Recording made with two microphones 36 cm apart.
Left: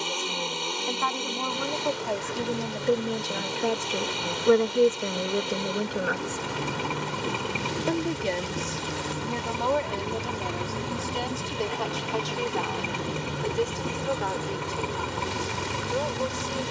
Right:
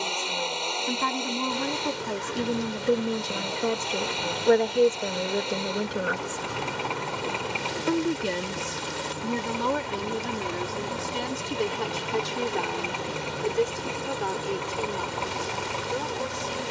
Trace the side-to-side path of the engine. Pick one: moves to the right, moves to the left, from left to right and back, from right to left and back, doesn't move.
doesn't move.